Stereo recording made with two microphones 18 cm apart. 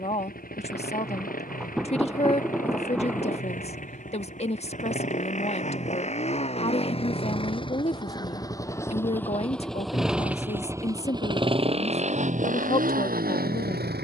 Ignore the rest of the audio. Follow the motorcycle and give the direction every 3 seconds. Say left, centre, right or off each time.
left, left, left, centre, right.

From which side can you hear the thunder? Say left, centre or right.
centre.